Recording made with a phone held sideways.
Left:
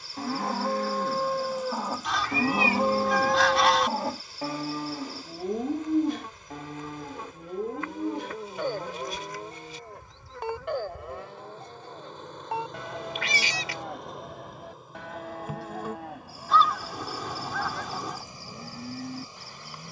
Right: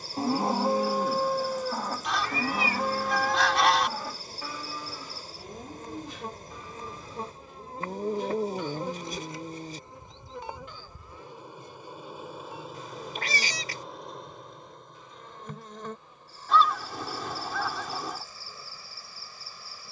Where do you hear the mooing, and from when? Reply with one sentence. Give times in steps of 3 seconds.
You can hear the mooing in the centre from 0 s and on the left from 3 s.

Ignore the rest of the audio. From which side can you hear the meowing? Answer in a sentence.
In this clip you hear the meowing on the right.